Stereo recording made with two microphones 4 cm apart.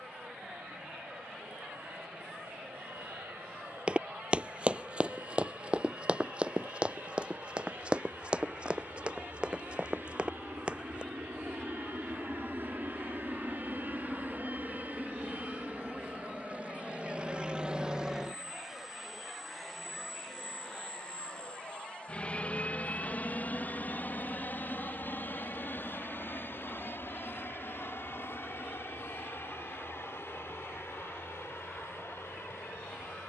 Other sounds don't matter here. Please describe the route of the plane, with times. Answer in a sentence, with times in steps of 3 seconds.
You can hear the plane on the right from 0 s, in the centre from 18 s and on the left from 21 s.